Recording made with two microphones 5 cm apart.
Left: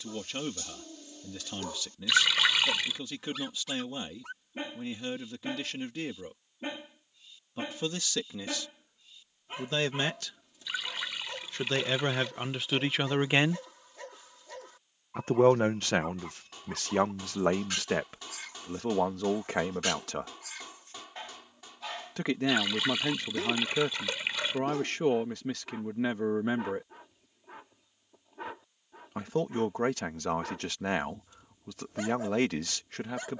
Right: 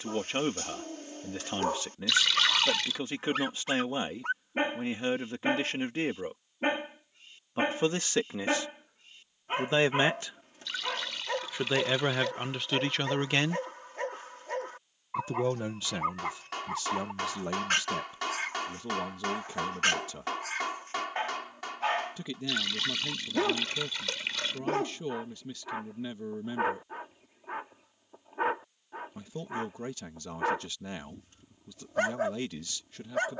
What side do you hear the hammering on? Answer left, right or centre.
right.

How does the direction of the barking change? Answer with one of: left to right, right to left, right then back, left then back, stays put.
stays put.